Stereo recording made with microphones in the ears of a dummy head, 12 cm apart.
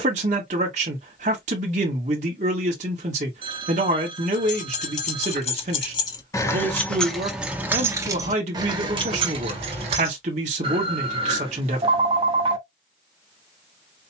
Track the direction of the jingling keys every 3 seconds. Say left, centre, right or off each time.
off, left, centre, right, off.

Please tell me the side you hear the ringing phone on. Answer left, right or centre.
right.